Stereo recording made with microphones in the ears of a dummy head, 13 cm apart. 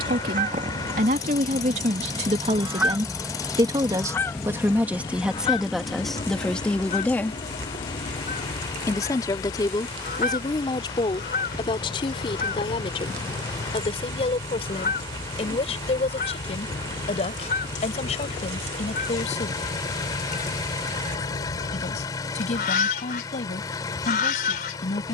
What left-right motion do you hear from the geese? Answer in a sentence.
In this clip you hear the geese move to the left.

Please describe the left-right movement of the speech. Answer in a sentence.
In this clip you hear the speech go from the right side to the left.